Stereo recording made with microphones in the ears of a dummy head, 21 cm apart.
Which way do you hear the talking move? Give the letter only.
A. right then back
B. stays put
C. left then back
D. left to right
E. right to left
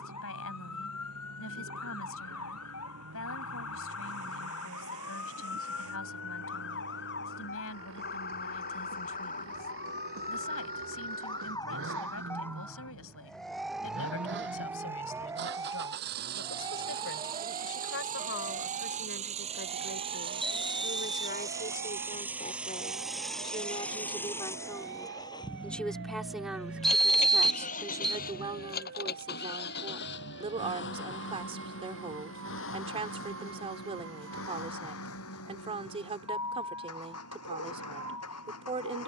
D.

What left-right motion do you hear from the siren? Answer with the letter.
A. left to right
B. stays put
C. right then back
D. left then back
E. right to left
A.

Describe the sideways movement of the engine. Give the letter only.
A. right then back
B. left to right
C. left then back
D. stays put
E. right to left
E.